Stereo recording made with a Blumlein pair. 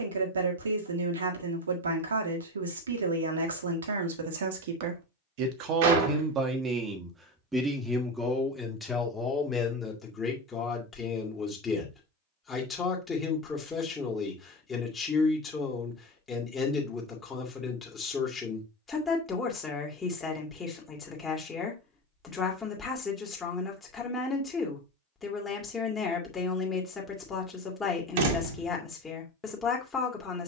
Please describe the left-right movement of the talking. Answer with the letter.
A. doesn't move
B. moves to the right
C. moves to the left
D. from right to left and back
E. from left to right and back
C.